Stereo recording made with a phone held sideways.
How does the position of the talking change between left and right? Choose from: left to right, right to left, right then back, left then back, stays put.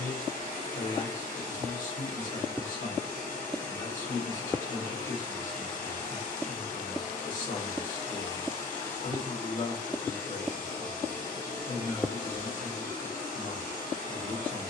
stays put.